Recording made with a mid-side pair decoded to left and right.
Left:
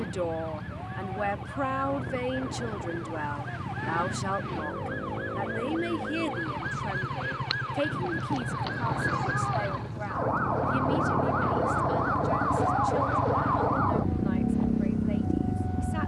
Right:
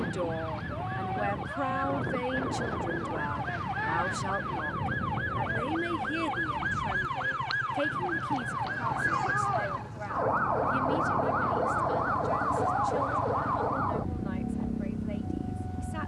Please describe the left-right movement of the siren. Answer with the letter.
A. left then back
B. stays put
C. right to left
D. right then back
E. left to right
C.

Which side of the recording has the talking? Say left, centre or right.
left.